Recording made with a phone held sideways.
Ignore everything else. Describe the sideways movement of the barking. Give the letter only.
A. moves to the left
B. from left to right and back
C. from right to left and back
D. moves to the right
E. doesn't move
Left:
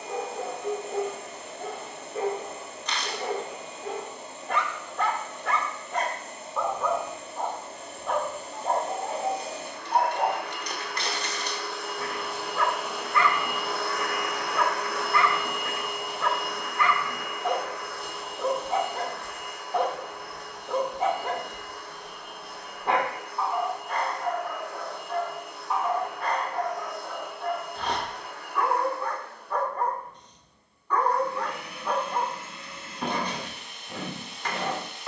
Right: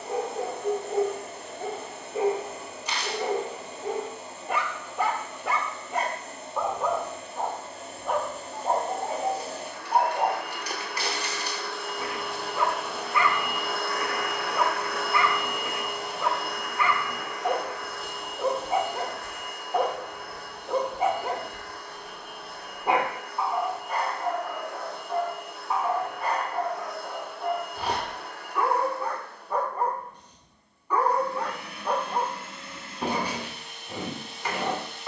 E.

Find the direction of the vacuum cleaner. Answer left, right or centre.
centre.